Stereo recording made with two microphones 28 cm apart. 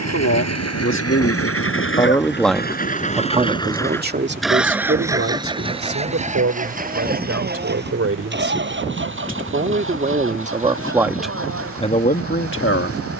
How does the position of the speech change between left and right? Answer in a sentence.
In this clip you hear the speech go right and come back.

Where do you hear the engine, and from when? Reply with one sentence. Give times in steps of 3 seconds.
In this clip you hear the engine on the left from 0 s, in the centre from 3 s and on the right from 6 s.